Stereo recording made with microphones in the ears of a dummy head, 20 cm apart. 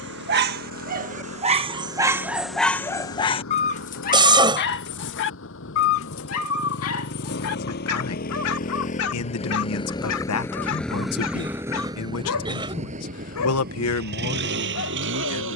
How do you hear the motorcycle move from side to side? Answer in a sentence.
In this clip you hear the motorcycle go from the left side to the right.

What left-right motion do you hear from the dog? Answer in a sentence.
In this clip you hear the dog go from the right side to the left.